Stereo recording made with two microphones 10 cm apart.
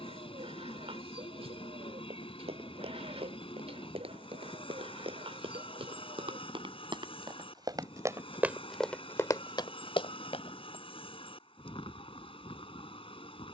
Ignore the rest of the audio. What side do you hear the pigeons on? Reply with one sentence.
In this clip you hear the pigeons on the right.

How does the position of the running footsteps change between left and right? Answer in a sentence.
You can hear the running footsteps move from right to left.